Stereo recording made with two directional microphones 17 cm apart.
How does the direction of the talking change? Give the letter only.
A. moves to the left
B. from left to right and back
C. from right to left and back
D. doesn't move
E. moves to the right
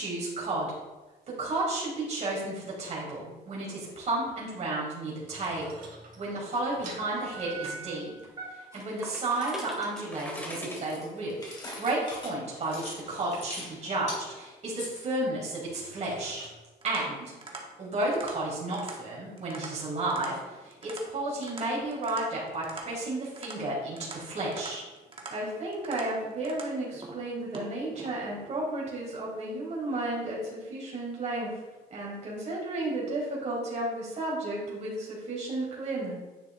D.